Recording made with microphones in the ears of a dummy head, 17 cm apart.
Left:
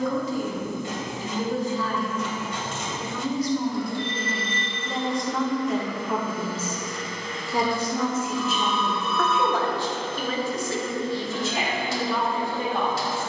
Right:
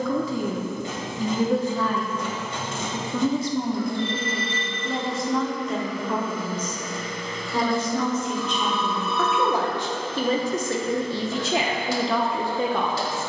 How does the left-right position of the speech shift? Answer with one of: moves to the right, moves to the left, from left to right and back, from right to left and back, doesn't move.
from right to left and back.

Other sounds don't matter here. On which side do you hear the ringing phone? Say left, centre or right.
left.